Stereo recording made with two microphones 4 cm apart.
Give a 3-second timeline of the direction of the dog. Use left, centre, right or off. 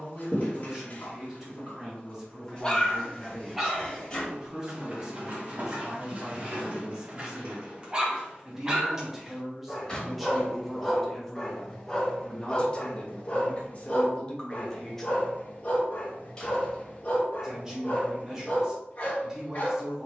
left, right, right, centre, left, left, left.